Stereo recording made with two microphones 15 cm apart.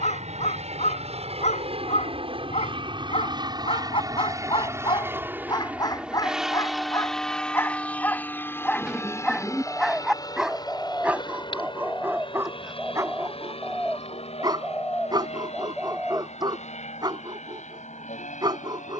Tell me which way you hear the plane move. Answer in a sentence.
You can hear the plane go from the right side to the left.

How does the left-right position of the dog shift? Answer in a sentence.
In this clip you hear the dog move from left to right.